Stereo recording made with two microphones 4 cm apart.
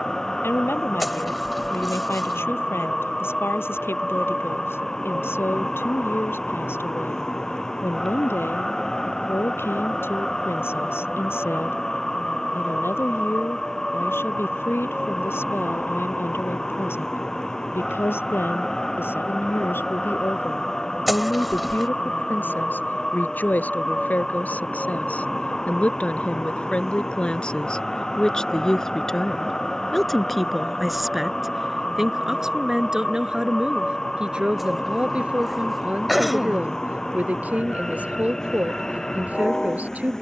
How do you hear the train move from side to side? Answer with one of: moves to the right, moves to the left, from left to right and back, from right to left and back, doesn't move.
doesn't move.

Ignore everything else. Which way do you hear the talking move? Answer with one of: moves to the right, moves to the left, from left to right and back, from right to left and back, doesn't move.
moves to the right.